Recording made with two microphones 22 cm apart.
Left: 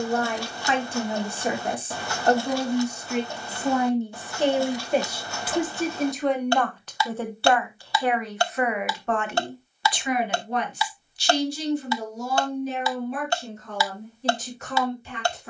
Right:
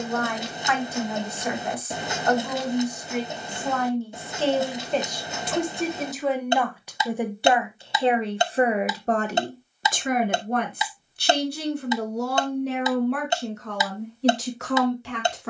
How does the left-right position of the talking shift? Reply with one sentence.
You can hear the talking go from the left side to the right.